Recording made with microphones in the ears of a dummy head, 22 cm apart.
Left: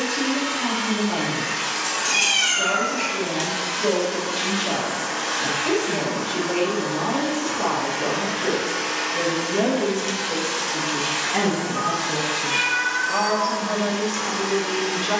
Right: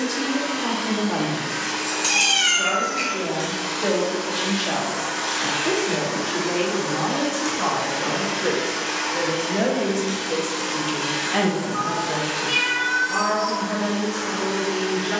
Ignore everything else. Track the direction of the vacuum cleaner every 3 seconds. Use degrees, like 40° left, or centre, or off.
40° left, centre, 20° right, 20° left, 40° left.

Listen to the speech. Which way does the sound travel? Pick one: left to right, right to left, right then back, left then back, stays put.
right to left.